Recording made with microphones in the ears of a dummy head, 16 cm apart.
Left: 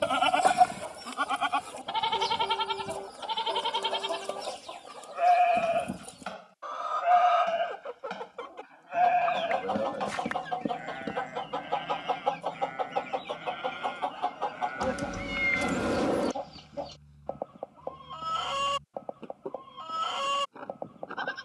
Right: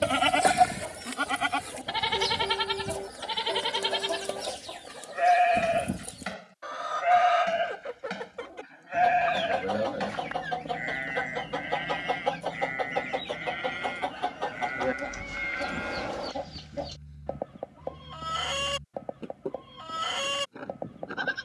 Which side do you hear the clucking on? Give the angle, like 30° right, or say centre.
20° right.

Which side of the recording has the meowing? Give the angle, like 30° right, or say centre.
60° left.